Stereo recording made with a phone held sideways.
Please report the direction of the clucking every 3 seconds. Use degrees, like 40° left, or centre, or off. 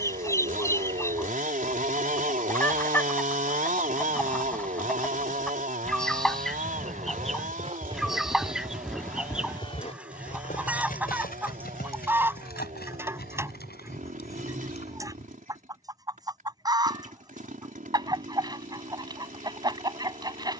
20° left, 10° left, centre, 10° right, 20° right, 20° right, 20° right.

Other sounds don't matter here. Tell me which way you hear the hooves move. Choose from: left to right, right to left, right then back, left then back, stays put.
right to left.